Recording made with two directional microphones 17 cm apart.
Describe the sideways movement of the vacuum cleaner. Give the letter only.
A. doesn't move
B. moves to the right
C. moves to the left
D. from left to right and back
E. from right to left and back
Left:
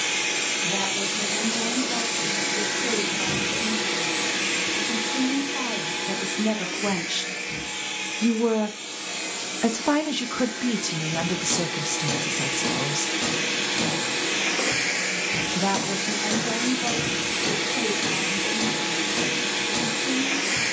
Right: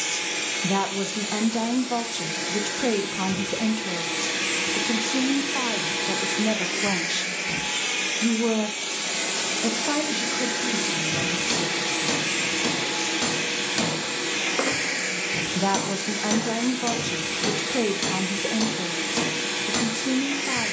D.